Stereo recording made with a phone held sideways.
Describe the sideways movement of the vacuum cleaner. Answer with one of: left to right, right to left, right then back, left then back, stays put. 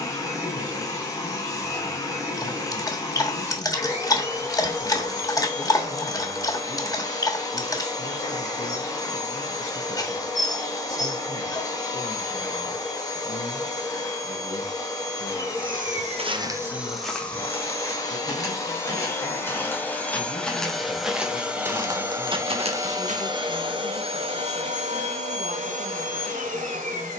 left to right.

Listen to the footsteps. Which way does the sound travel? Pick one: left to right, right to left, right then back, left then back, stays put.
left then back.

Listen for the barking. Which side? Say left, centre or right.
left.